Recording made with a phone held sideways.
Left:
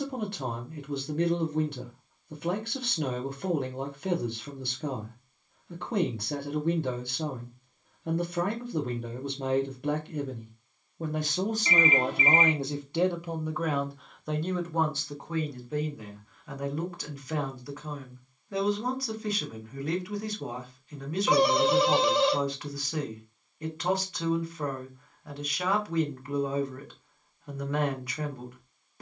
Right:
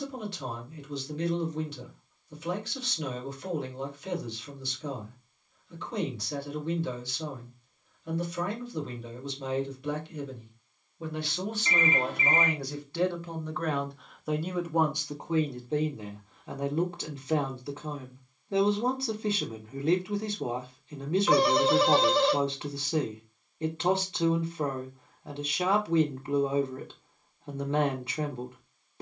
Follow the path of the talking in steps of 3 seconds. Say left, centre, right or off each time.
left, left, left, left, centre, right, right, right, right, right.